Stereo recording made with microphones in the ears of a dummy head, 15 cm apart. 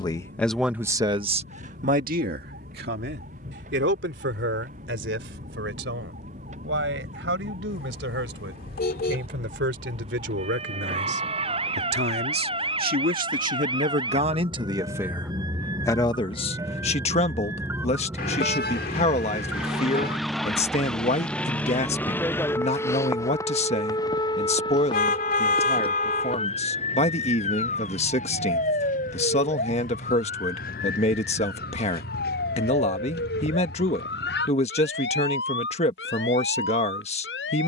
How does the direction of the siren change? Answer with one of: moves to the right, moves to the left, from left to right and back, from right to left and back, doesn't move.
moves to the left.